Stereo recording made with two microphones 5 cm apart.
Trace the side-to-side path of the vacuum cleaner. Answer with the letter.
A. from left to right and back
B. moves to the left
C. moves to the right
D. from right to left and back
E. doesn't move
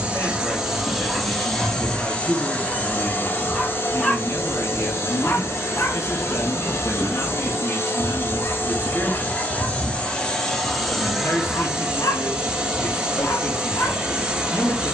D.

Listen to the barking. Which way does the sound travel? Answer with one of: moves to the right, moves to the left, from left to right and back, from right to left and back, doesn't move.
moves to the left.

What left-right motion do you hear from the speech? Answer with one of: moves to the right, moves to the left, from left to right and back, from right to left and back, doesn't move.
doesn't move.